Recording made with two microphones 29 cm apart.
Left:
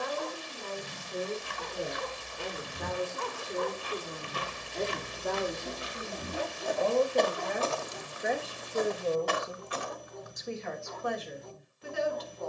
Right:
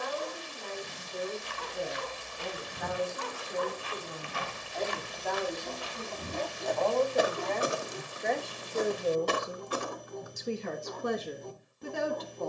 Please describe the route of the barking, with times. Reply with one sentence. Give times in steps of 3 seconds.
You can hear the barking on the left from 0 s and on the right from 6 s.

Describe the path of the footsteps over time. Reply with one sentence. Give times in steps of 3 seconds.
You can hear the footsteps on the left from 0 s, in the centre from 6 s and on the right from 9 s.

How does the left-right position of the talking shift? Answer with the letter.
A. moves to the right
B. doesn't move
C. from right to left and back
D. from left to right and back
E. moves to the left
A.